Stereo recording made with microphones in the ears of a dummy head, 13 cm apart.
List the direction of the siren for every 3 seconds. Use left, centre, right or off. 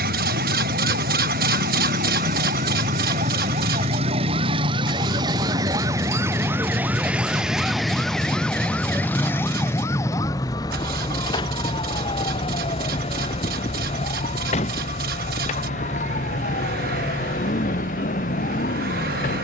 right, right, centre, left, left, left, left.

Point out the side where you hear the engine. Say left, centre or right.
right.